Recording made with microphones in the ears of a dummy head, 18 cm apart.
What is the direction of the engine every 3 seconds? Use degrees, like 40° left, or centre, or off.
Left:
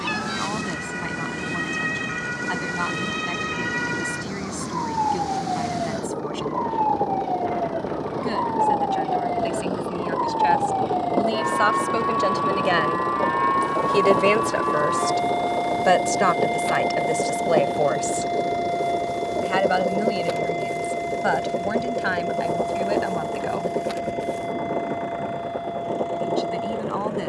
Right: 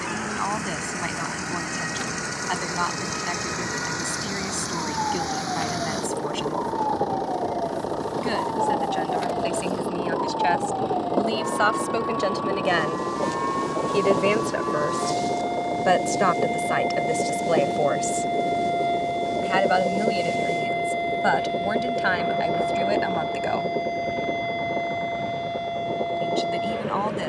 50° right, 40° right, 30° right, 10° right, 10° left, 30° left, 40° left, 50° left, 60° left.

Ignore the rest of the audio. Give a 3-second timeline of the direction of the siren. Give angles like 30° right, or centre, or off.
70° left, 70° left, 60° left, 50° left, 30° left, 10° left, 20° right, 40° right, 50° right.